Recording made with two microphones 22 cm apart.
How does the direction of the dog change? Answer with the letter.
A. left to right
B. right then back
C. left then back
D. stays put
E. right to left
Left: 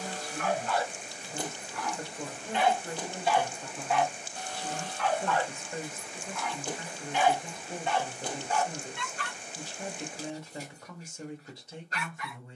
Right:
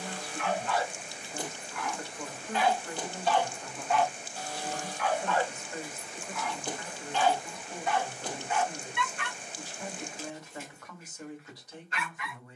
B.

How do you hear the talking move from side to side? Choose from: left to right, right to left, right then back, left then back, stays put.
stays put.